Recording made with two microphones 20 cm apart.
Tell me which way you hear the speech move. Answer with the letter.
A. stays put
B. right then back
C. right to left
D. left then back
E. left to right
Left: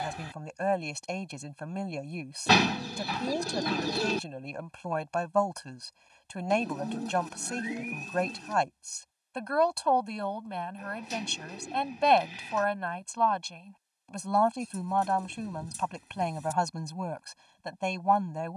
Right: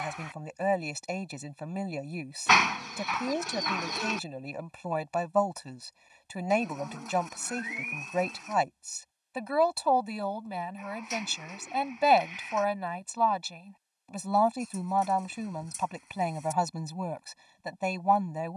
A.